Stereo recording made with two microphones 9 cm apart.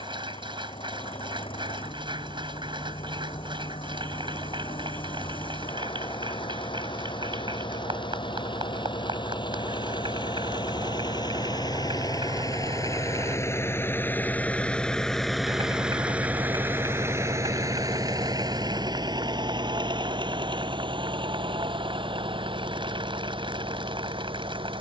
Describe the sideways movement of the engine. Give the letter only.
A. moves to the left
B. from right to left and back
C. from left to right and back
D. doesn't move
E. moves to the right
E.